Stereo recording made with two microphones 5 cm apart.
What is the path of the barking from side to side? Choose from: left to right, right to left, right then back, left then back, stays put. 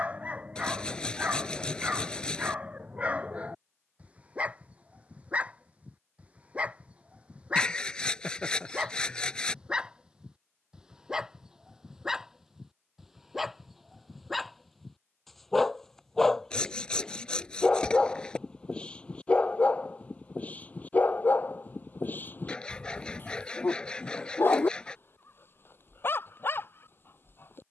right to left.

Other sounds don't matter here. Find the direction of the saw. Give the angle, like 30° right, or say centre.
20° left.